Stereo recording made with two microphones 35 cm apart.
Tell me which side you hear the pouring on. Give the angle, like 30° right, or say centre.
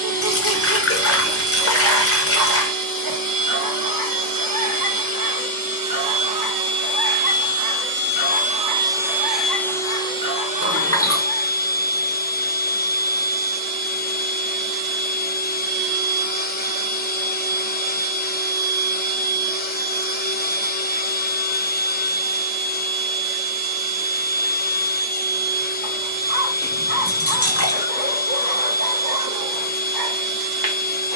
40° left.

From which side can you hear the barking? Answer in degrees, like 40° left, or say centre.
70° right.